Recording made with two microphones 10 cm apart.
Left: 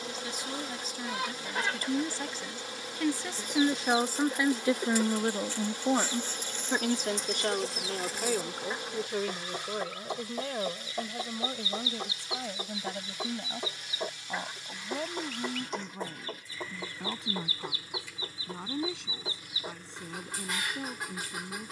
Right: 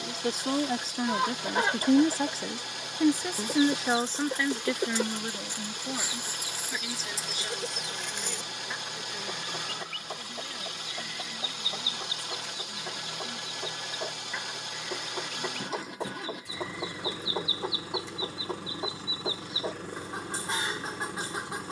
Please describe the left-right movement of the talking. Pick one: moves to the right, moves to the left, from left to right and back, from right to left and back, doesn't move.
moves to the left.